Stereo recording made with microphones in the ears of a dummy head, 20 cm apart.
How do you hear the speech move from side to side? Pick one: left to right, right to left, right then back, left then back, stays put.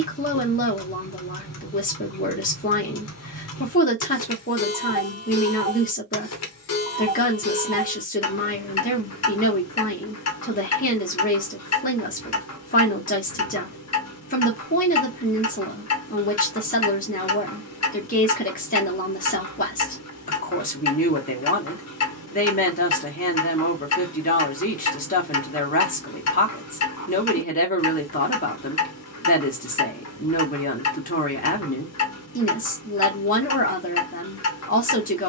stays put.